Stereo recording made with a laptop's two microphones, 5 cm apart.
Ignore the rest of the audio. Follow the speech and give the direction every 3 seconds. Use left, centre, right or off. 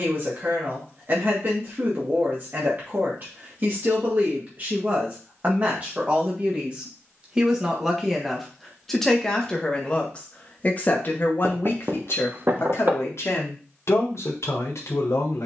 right, right, centre, left, left.